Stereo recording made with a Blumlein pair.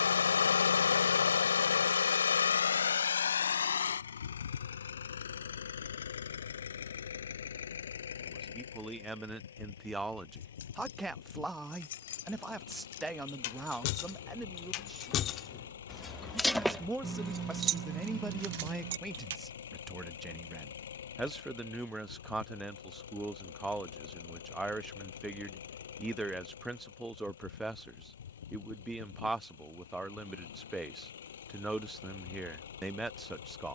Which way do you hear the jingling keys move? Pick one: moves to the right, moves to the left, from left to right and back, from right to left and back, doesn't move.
moves to the right.